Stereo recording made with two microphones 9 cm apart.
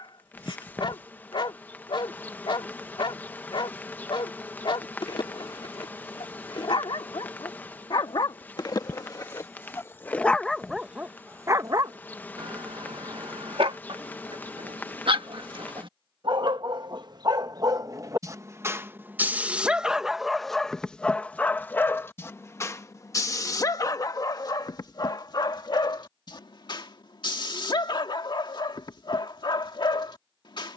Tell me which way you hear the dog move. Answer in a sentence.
You can hear the dog go right and come back.